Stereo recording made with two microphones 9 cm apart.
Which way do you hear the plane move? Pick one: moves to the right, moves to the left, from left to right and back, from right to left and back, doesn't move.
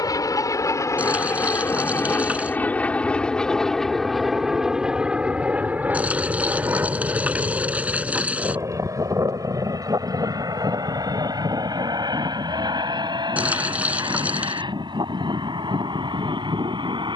moves to the right.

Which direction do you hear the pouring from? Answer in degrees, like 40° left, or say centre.
20° right.